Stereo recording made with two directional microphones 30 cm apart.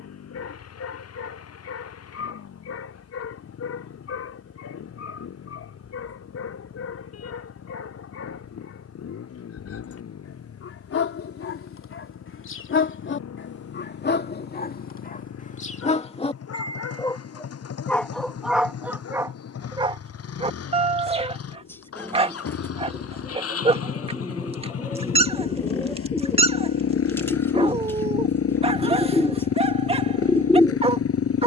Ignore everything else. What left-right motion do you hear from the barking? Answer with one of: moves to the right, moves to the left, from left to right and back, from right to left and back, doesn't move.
moves to the right.